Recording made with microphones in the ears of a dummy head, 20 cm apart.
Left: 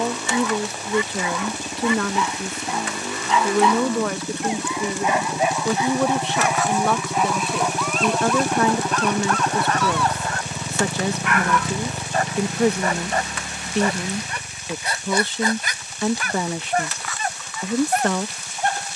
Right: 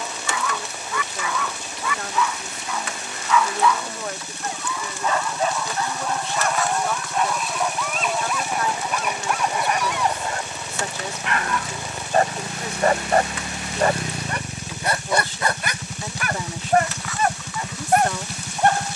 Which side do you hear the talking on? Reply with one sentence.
You can hear the talking on the left.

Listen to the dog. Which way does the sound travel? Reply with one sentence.
You can hear the dog travel towards the right.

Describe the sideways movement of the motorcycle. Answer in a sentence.
You can hear the motorcycle travel towards the right.